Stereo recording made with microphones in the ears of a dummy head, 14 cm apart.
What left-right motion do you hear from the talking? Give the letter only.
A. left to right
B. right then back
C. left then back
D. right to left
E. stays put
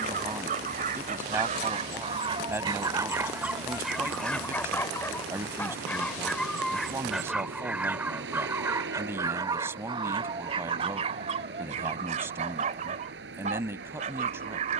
E.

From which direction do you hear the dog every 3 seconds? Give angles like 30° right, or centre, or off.
50° right, centre, 10° right, 40° right, 50° right.